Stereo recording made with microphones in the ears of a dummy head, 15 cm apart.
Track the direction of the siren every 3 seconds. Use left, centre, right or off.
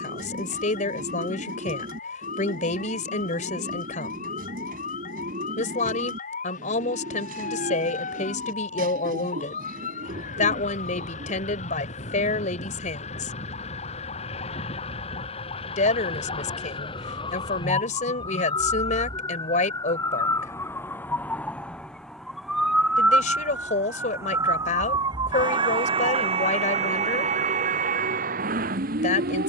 left, left, left, left, left, left, left, centre, right, right.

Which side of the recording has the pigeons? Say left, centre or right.
right.